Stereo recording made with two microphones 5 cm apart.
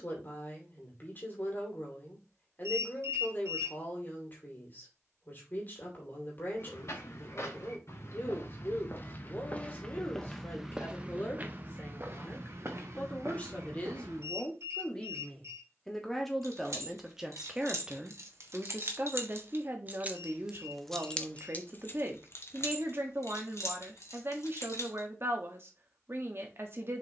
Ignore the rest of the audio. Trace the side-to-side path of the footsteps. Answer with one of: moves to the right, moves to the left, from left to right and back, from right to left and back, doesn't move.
moves to the right.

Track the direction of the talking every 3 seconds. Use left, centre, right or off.
left, left, left, left, left, centre, right, right, right.